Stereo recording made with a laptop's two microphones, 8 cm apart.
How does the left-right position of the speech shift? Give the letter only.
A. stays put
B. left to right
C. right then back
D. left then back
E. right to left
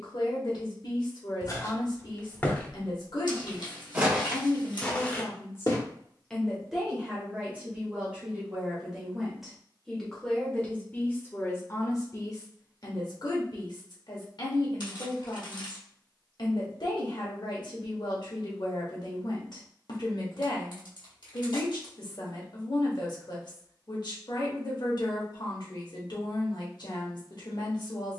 C.